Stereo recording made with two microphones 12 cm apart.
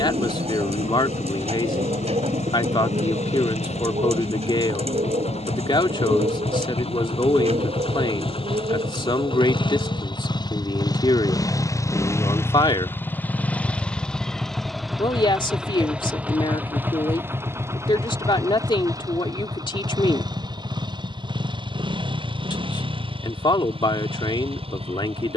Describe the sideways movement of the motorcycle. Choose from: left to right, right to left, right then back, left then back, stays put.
left to right.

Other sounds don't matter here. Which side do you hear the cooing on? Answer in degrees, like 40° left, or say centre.
60° right.